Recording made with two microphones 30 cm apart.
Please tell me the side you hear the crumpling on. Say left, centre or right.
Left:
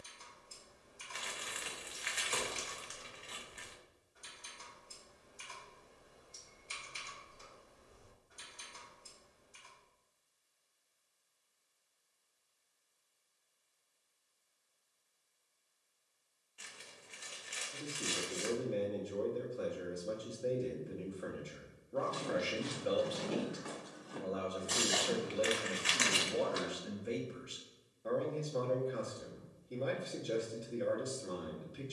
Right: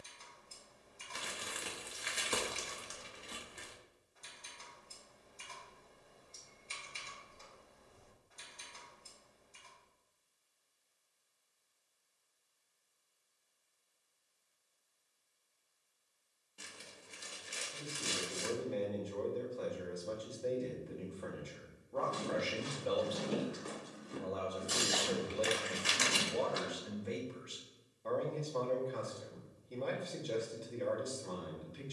right.